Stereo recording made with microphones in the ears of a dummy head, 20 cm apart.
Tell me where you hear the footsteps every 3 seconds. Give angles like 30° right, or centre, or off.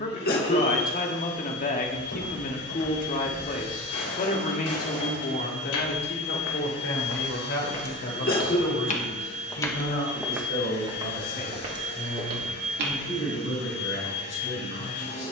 80° left, 80° left, 60° left, 10° right, 50° right.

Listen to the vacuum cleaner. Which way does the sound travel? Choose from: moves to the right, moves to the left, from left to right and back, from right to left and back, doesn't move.
doesn't move.